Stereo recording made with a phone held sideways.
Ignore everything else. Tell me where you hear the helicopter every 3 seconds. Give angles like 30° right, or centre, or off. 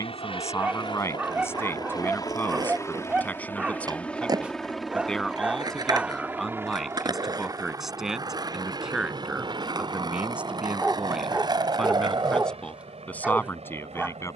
30° left, centre, 20° right, 40° right, 50° right.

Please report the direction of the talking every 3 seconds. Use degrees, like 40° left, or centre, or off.
20° left, 10° left, centre, 10° right, 10° left.